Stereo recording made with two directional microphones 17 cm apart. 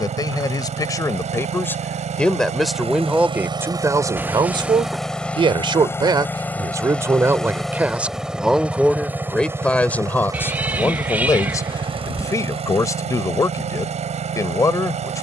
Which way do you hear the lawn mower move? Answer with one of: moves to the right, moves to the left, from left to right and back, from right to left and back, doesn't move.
from right to left and back.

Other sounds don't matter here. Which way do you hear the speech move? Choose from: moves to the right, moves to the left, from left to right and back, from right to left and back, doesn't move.
from left to right and back.